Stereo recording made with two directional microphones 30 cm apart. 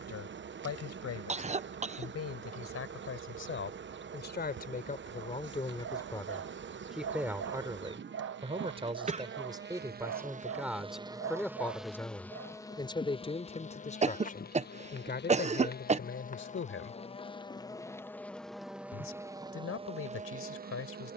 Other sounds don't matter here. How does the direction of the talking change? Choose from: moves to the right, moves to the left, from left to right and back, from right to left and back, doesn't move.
from left to right and back.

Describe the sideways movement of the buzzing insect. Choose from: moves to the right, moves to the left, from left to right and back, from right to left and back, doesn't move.
from right to left and back.